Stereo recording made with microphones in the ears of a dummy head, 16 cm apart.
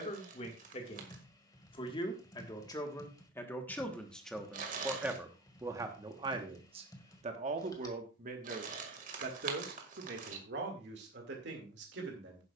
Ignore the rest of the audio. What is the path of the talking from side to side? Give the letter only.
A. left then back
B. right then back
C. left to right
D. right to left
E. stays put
C.